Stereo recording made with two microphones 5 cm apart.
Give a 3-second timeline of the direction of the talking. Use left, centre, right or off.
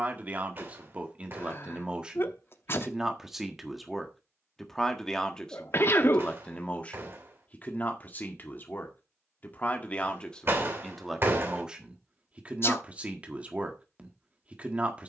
right, centre, left, centre, right.